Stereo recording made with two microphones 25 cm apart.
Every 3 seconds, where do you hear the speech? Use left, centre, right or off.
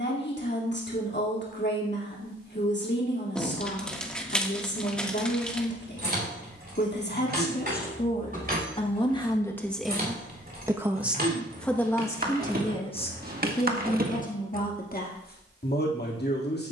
left, left, left, centre, left, left.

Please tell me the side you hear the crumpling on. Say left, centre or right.
centre.